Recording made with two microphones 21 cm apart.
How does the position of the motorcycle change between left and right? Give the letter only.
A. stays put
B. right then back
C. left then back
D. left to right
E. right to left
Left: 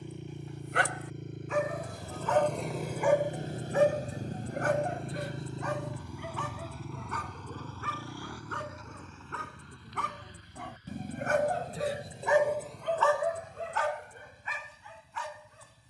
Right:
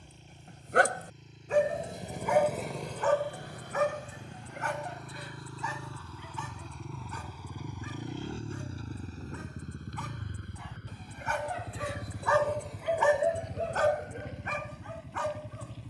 D.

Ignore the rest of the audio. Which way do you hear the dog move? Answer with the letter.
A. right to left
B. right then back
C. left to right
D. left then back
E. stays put
D.